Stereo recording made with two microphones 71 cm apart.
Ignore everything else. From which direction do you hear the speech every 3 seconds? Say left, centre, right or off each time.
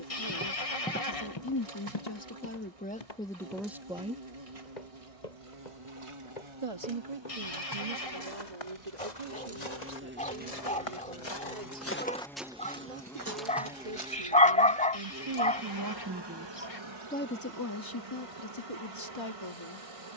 left, centre, right, right, right, centre, left.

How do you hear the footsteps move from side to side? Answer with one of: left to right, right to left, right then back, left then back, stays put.
left then back.